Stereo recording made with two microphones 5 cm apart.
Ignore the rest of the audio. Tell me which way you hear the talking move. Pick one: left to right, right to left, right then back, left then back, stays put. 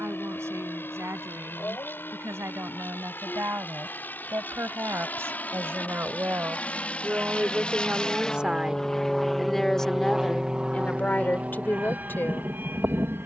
right to left.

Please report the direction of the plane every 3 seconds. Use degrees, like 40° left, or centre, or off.
50° left, 40° left, 20° left, 10° right, 40° right.